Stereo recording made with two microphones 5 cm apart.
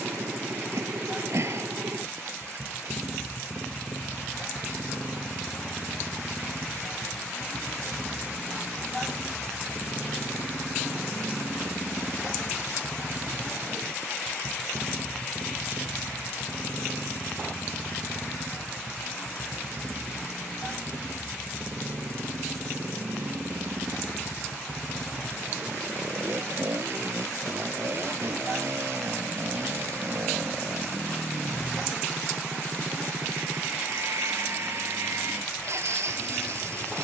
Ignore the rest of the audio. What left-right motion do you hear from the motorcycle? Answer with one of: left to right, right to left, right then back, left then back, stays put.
stays put.